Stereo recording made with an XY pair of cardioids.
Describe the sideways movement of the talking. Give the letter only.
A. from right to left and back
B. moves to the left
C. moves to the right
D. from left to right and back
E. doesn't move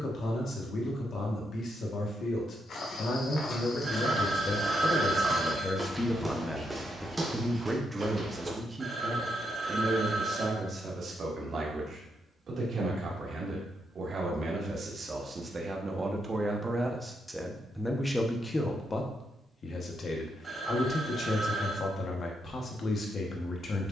D.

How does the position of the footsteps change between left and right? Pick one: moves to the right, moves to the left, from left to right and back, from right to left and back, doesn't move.
moves to the right.